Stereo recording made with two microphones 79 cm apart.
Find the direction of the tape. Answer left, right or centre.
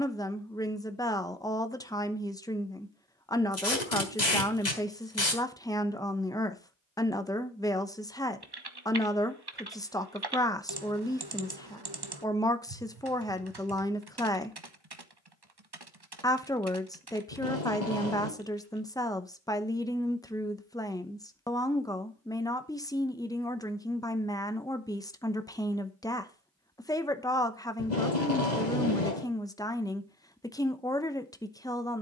left.